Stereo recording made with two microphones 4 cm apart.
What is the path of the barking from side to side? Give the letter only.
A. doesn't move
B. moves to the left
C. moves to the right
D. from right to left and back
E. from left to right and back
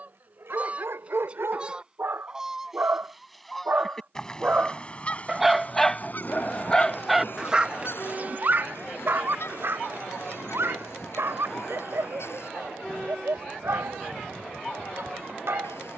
D.